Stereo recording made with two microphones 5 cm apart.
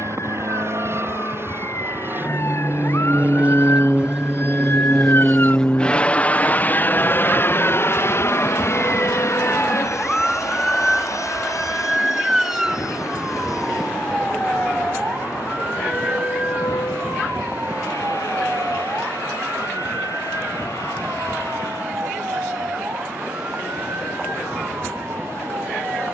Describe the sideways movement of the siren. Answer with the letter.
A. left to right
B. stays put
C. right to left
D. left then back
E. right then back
A.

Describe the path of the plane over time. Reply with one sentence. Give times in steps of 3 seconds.
In this clip you hear the plane on the right from 0 s, in the centre from 3 s and on the left from 6 s.